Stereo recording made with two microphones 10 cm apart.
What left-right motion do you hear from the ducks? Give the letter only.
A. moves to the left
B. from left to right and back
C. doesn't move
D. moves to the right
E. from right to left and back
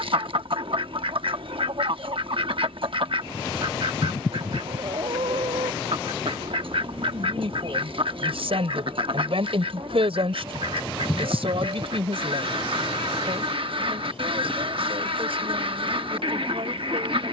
C.